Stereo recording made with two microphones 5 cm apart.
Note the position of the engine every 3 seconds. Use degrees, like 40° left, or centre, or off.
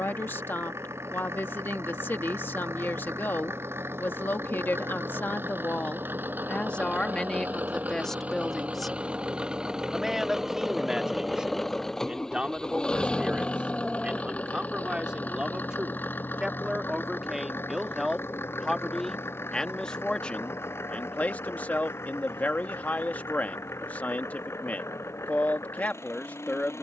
60° right, 50° right, 40° right, 10° right, 20° left, 40° left, 60° left, 60° left, 70° left.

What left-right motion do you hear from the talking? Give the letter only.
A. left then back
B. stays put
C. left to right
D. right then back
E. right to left
D.